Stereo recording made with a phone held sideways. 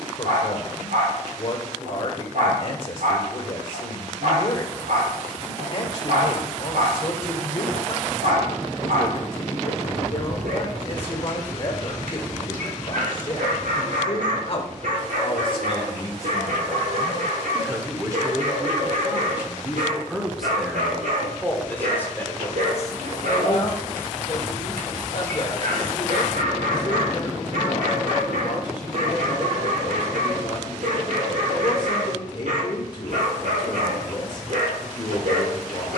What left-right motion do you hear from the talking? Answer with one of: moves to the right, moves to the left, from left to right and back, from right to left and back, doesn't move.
from left to right and back.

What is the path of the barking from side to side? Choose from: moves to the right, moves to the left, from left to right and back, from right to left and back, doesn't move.
doesn't move.